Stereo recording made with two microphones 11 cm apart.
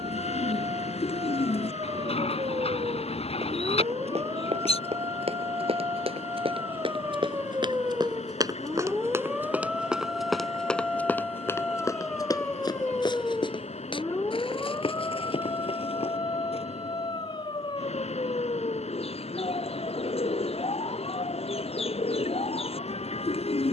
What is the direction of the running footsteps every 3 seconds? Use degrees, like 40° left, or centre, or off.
off, 60° right, 40° right, centre, 40° left, 60° left, off, off.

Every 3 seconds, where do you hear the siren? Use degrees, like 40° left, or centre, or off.
40° right, 30° right, 20° right, centre, 20° left, 40° left, 50° left, 60° left.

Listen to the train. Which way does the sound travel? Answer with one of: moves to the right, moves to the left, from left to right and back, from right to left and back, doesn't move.
doesn't move.